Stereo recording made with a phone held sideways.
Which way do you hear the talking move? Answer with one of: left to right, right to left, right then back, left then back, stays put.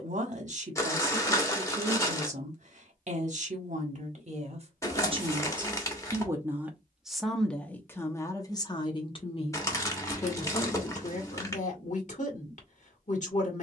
right to left.